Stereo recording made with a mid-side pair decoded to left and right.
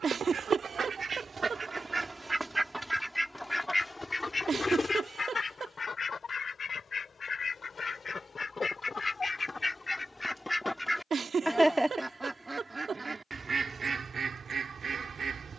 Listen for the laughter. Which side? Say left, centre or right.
right.